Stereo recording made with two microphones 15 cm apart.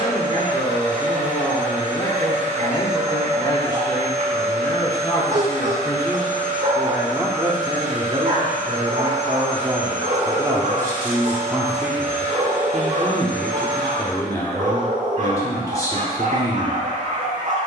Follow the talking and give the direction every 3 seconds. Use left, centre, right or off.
left, left, right, right, centre, left.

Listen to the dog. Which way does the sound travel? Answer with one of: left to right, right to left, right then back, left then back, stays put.
stays put.